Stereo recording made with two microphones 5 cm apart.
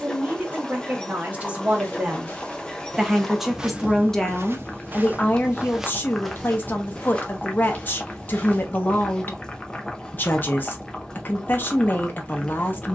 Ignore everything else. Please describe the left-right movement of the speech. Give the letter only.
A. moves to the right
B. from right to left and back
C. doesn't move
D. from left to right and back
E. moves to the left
E.